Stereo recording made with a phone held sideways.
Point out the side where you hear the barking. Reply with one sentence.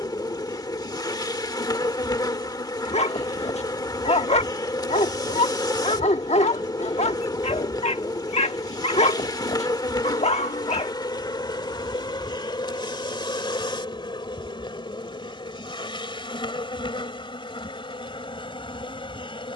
You can hear the barking on the left.